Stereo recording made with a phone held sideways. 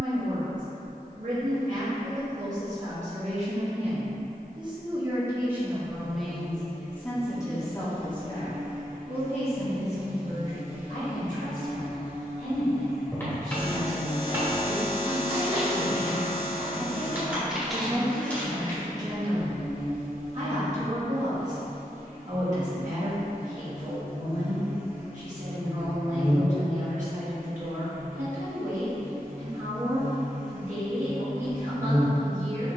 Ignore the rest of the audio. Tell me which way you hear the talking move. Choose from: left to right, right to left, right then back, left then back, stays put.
left then back.